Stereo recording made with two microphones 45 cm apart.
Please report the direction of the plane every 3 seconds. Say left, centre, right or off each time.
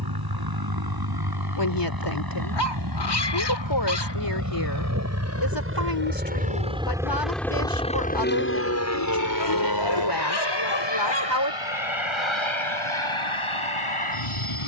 right, right, centre, left, left.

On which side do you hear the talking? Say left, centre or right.
left.